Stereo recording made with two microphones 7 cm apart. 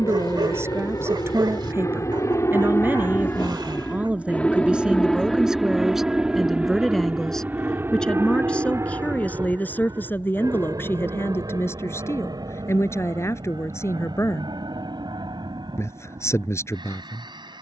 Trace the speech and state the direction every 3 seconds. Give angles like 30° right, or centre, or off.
30° right, 10° right, 10° left, 30° left, 40° left, 40° left.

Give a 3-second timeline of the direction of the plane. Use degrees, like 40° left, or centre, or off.
50° left, 10° left, 20° right, 40° right, 60° right, 60° right.